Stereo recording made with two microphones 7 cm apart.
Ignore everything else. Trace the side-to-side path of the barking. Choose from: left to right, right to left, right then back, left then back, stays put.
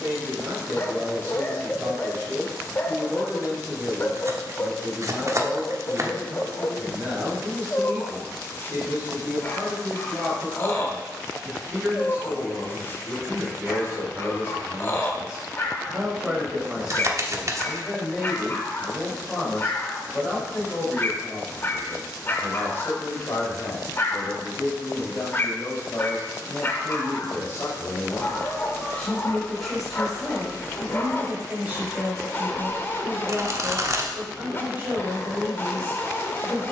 stays put.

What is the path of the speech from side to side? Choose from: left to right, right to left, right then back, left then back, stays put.
left then back.